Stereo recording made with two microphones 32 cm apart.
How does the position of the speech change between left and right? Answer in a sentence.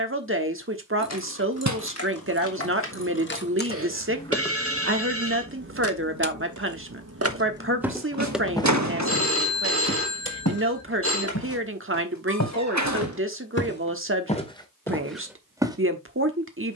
You can hear the speech stay in one place.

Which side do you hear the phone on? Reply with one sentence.
In this clip you hear the phone on the right.